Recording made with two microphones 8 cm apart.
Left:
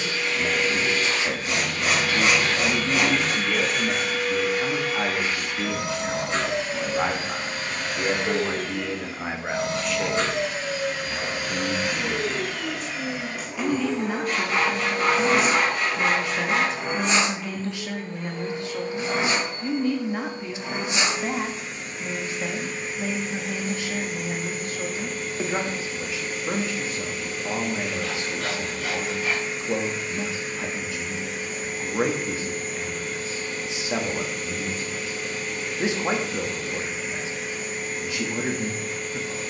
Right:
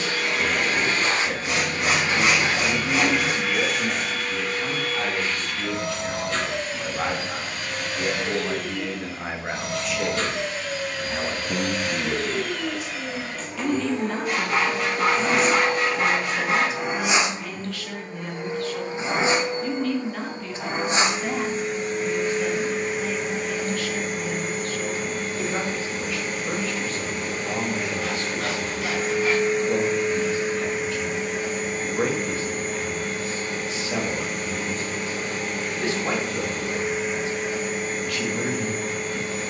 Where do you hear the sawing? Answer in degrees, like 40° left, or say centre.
10° right.